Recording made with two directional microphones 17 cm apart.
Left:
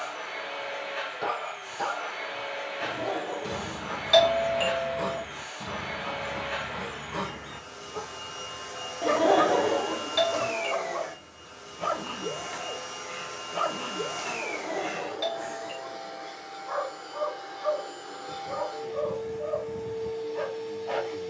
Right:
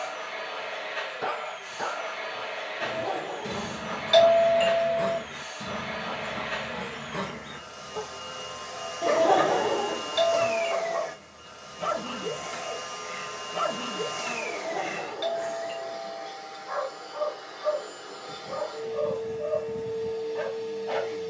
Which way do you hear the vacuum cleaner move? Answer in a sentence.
You can hear the vacuum cleaner stay in one place.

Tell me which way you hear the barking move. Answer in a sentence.
In this clip you hear the barking stay in one place.